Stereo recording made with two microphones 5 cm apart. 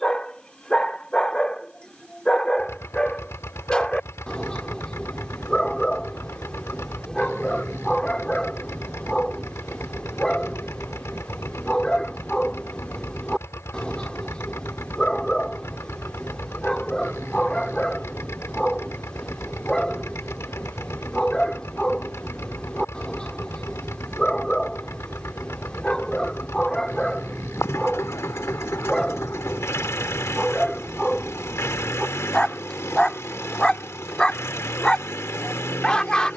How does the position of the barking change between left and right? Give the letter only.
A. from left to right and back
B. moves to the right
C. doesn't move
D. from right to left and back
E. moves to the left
C.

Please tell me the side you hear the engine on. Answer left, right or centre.
left.